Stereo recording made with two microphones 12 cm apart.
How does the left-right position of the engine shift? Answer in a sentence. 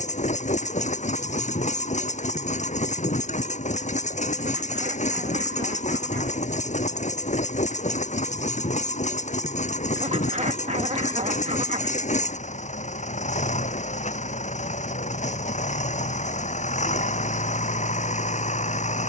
In this clip you hear the engine stay in one place.